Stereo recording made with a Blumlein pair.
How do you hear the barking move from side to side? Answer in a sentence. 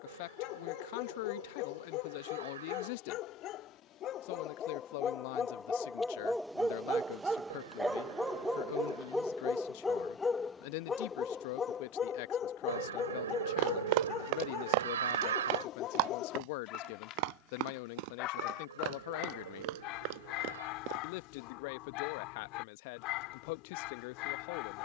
In this clip you hear the barking move from left to right and back again.